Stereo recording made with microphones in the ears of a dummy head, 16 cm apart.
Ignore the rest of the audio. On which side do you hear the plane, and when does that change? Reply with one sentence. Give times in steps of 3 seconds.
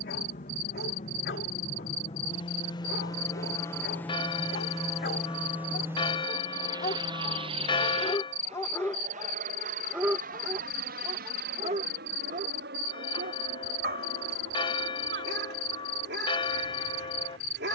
You can hear the plane on the left from 0 s, in the centre from 3 s and on the right from 6 s.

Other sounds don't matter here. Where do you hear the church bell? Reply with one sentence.
In this clip you hear the church bell on the left.